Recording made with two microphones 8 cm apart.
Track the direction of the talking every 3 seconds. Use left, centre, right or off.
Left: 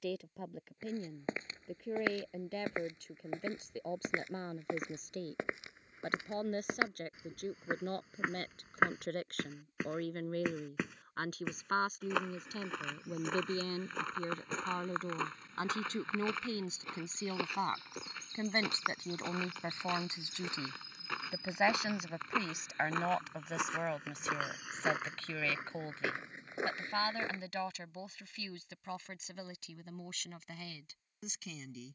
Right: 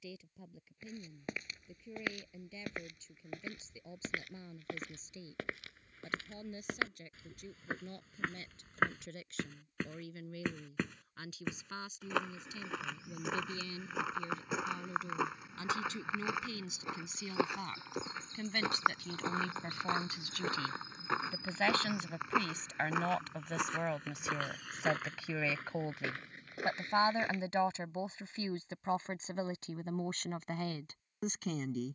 left, left, left, left, left, left, left, centre, centre, right, right.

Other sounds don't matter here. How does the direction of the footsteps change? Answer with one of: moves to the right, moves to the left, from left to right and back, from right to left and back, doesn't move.
from left to right and back.